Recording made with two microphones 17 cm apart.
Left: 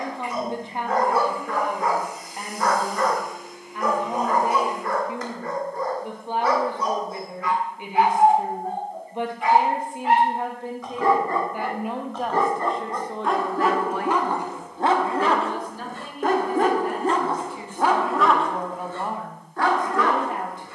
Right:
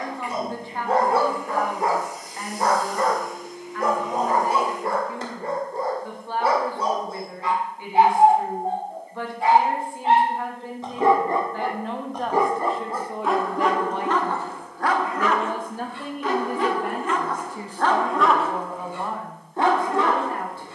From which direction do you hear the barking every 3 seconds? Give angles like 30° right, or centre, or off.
30° right, 30° right, 30° right, 20° right, centre, 40° left, 20° right.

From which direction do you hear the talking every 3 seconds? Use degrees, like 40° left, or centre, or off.
20° left, 20° left, 20° left, 20° left, 10° right, 50° right, 10° left.